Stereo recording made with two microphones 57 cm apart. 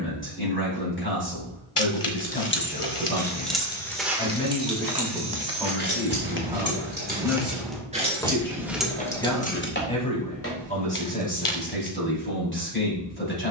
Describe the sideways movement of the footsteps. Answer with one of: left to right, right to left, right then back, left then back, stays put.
right then back.